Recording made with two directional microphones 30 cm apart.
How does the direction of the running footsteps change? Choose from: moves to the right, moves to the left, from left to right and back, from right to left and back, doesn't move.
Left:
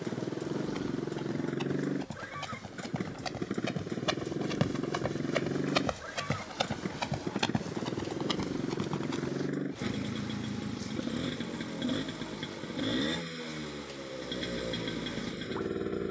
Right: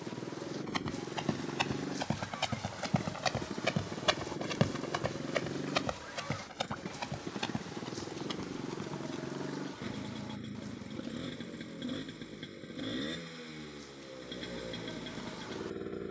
moves to the left.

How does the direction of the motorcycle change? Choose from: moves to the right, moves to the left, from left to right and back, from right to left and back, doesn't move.
doesn't move.